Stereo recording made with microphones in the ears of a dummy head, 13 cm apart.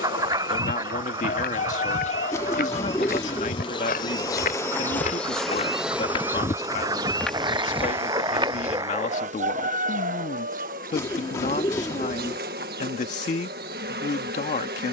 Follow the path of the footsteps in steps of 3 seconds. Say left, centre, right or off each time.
left, left, centre, off, off.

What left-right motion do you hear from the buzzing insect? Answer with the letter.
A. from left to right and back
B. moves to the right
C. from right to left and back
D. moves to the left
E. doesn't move
B.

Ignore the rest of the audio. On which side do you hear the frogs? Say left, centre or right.
right.